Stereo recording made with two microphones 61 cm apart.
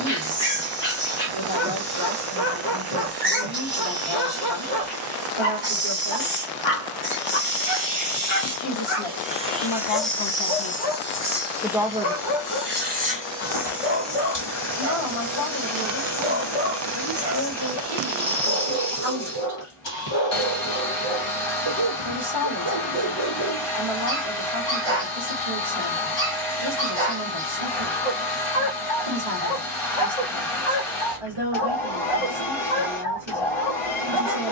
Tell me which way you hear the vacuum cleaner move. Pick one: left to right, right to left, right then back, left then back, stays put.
right to left.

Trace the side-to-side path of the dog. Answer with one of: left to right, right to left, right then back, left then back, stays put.
stays put.